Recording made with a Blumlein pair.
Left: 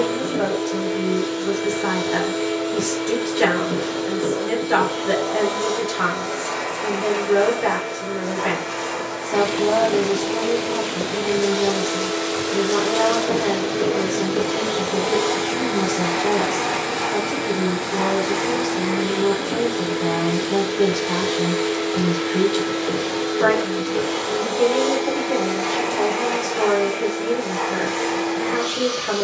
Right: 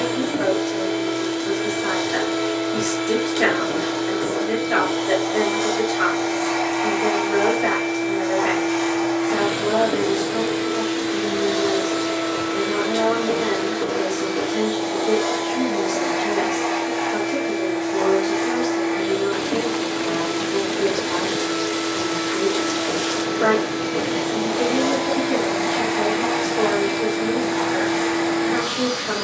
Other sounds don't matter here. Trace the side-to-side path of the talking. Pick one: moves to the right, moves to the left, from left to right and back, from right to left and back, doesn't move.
doesn't move.